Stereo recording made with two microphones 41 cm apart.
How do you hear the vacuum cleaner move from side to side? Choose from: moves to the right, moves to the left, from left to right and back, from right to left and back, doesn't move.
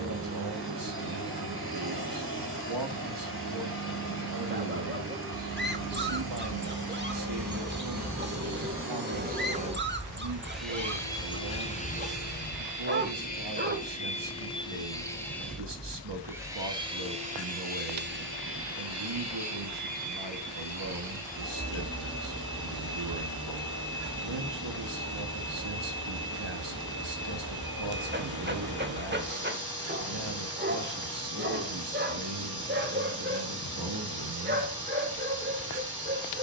from right to left and back.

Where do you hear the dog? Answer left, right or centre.
right.